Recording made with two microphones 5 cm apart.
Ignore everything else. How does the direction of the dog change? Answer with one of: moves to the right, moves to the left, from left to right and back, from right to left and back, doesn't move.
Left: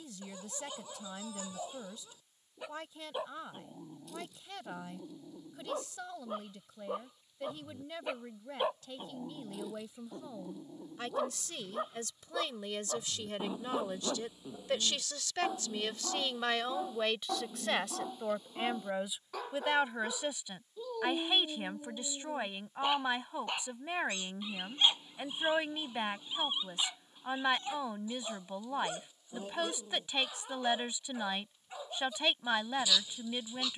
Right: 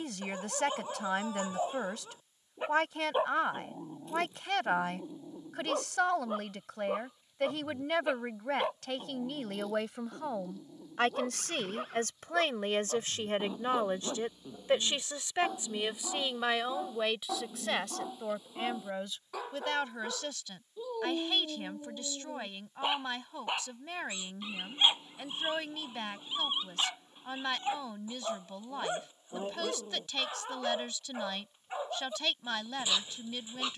from right to left and back.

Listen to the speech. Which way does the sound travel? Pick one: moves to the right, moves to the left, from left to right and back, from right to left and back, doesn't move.
moves to the left.